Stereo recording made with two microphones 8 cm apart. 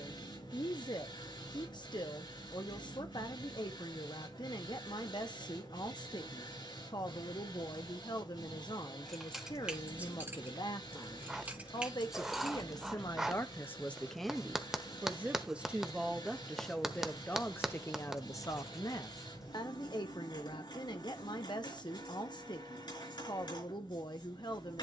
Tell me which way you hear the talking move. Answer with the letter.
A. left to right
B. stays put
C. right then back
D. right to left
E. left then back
C.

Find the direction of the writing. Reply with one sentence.
In this clip you hear the writing in the centre.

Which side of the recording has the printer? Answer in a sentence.
In this clip you hear the printer on the left.